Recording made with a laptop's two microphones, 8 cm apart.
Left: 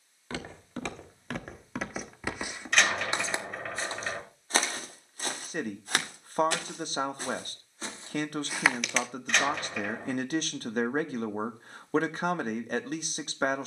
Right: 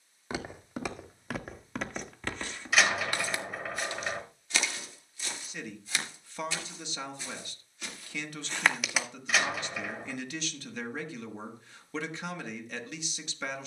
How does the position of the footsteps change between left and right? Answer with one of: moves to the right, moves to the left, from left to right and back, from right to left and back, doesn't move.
from right to left and back.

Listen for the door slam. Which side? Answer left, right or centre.
centre.